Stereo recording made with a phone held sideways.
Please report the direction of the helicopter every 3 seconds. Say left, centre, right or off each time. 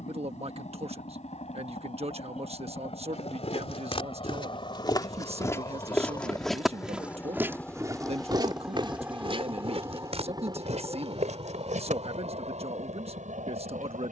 left, left, centre, right, right.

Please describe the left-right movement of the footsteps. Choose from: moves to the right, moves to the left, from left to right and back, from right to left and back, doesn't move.
moves to the right.